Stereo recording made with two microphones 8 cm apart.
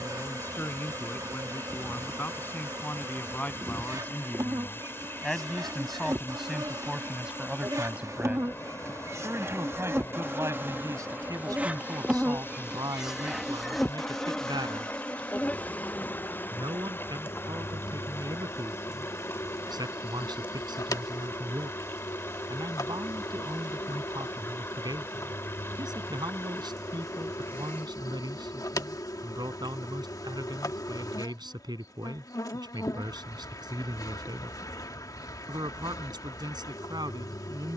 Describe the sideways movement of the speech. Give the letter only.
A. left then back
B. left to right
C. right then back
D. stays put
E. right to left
B.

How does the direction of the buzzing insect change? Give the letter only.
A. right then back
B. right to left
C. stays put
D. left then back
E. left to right
B.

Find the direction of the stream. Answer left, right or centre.
left.